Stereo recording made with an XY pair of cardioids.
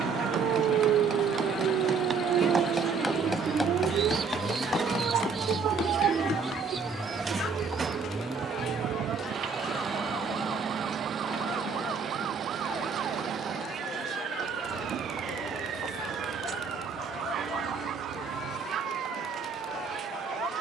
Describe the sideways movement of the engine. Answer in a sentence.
In this clip you hear the engine move to the right.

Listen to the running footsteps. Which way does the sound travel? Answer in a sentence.
In this clip you hear the running footsteps move to the left.